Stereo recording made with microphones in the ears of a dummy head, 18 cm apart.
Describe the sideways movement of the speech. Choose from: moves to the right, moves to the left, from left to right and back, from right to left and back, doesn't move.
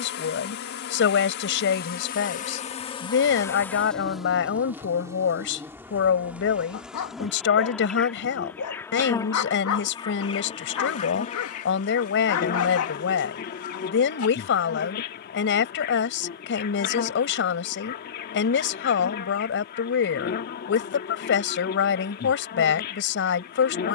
doesn't move.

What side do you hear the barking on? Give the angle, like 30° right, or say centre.
80° left.